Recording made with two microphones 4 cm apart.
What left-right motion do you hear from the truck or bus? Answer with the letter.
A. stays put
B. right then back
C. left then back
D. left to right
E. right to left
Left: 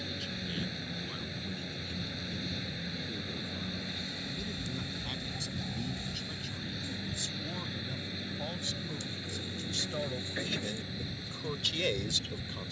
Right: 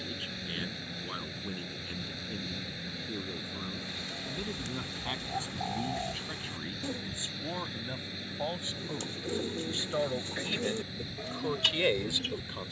A.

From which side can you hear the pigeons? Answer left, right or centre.
right.